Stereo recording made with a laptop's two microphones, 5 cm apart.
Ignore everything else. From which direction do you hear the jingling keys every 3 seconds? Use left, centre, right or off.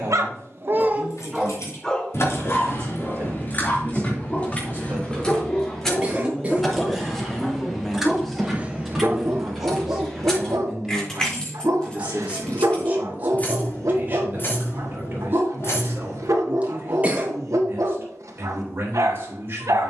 left, left, centre, centre, left, left, off.